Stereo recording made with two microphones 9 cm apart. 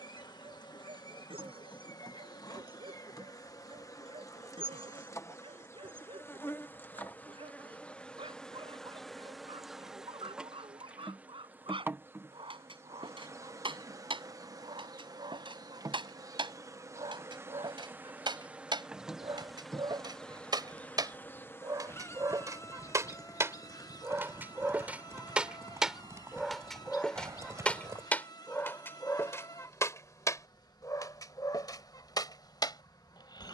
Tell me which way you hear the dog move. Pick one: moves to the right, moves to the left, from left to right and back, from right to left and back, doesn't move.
moves to the left.